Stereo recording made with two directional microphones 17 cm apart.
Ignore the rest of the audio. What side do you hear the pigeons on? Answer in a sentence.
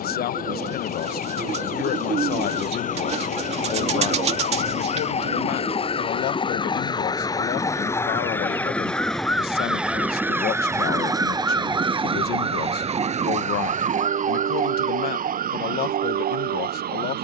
You can hear the pigeons on the right.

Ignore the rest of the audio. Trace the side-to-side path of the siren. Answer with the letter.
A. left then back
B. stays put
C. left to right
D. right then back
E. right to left
C.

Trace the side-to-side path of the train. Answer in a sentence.
You can hear the train move to the right.